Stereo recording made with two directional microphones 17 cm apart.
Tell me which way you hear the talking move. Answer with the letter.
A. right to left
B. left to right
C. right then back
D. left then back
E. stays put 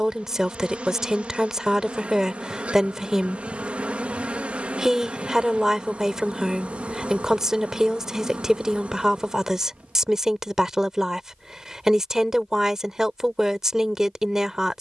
E.